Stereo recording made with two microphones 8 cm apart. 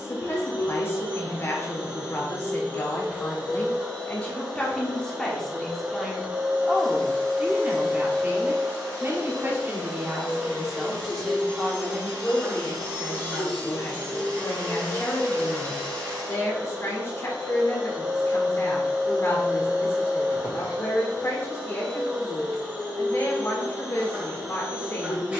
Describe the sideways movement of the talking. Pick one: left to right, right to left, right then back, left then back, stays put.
right then back.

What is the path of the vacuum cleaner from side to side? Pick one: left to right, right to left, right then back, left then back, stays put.
stays put.